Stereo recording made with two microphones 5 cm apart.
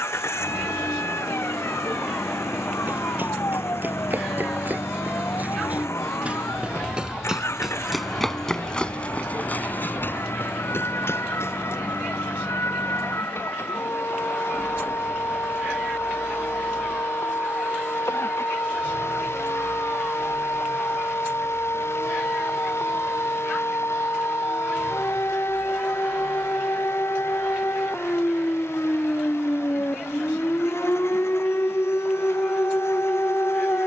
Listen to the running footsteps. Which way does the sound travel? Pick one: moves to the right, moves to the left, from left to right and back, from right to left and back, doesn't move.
moves to the left.